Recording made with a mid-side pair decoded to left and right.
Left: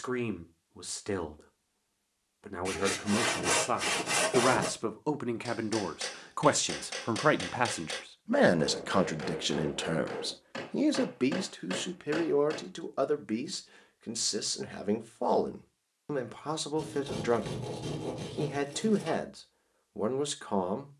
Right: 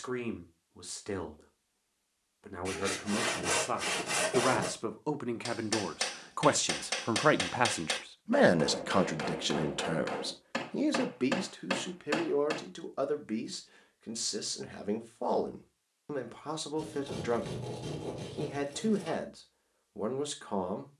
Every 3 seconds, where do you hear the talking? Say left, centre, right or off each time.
left, left, centre, left, left, left, left.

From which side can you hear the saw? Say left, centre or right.
left.